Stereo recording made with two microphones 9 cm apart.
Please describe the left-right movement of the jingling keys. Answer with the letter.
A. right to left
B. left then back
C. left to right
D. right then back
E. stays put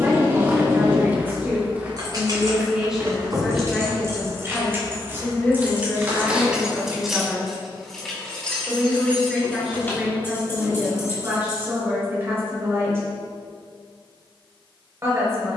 A.